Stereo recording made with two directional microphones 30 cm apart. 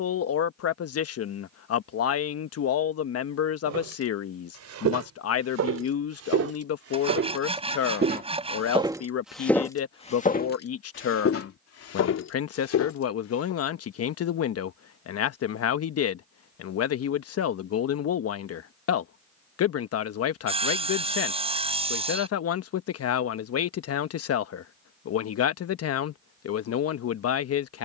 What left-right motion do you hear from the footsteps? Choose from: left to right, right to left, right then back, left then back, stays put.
right to left.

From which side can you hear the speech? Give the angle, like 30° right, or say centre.
50° left.